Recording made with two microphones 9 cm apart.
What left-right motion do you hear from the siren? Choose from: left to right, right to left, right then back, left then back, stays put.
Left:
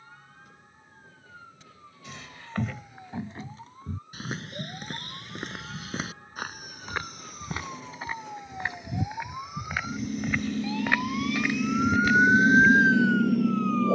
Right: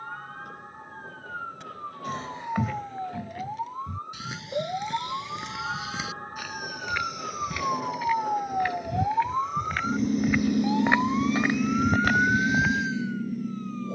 right to left.